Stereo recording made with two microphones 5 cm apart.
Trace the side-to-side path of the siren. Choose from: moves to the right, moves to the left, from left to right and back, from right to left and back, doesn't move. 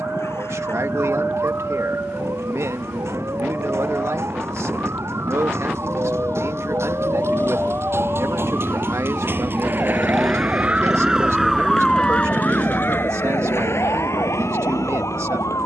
moves to the left.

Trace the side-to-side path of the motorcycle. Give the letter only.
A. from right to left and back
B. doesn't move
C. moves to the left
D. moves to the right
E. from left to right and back
D.